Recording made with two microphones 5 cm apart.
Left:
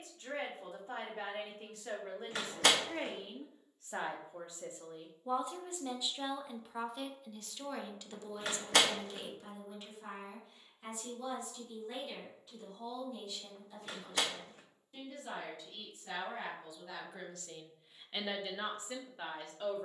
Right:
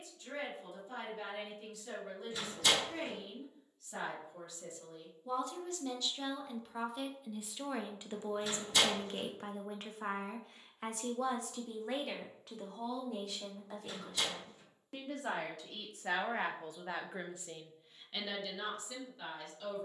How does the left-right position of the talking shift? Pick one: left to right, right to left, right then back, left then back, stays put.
right then back.